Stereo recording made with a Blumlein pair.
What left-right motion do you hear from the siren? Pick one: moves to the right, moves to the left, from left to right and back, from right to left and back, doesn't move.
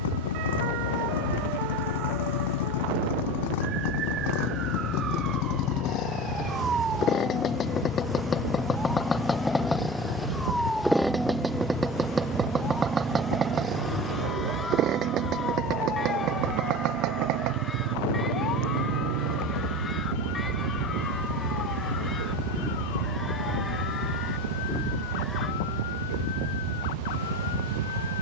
moves to the left.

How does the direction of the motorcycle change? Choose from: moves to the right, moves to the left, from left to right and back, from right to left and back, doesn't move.
moves to the right.